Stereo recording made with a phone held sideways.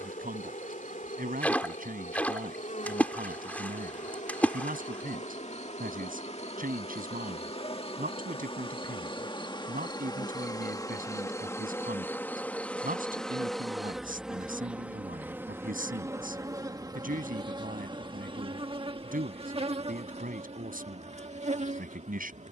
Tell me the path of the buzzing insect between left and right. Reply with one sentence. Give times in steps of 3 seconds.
In this clip you hear the buzzing insect on the left from 0 s, in the centre from 12 s and on the right from 15 s.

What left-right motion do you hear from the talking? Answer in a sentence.
You can hear the talking stay in one place.